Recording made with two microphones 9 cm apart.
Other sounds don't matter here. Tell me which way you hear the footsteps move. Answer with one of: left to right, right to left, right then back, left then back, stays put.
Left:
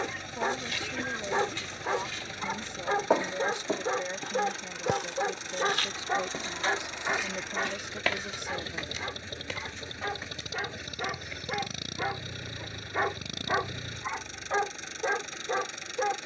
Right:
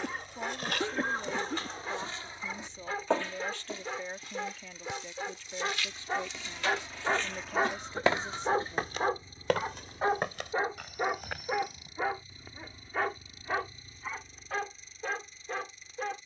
left then back.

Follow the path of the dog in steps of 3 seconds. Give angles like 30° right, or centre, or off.
30° left, 30° left, 20° right, 30° right, 20° left, 30° left.